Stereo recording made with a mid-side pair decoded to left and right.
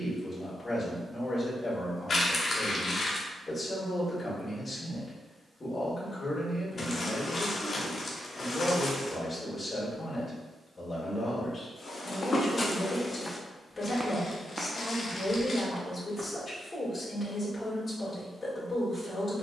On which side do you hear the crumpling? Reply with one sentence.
You can hear the crumpling on the left.